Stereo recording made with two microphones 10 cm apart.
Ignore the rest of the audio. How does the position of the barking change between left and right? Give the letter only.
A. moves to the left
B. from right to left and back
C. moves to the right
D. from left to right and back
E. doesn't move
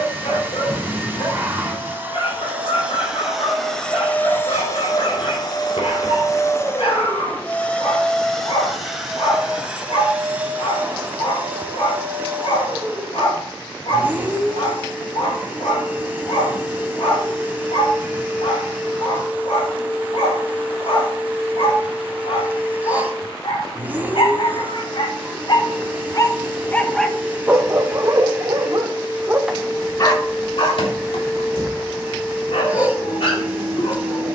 D.